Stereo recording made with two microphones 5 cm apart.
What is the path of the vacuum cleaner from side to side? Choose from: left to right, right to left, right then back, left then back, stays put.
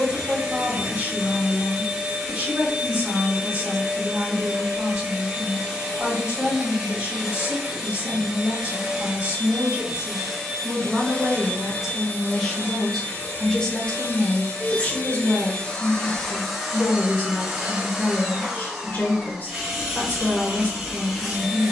left then back.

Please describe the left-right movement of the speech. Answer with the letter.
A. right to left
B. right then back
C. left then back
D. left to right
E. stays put
A.